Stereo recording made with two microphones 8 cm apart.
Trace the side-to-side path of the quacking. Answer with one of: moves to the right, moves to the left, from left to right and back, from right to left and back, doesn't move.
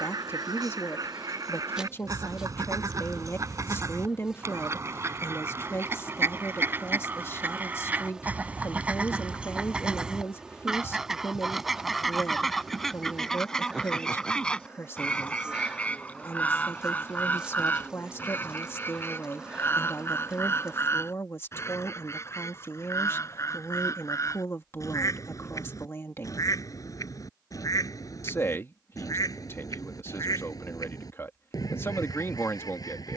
moves to the left.